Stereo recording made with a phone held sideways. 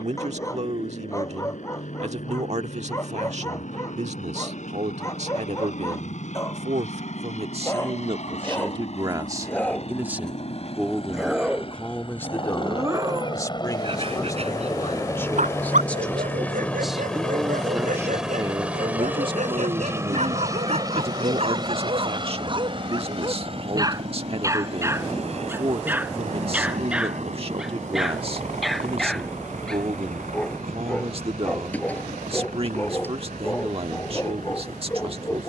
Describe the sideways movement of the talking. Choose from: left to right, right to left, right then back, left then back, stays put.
left then back.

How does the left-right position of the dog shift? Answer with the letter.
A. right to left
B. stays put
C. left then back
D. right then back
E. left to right
D.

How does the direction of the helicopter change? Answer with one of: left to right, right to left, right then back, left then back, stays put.
left to right.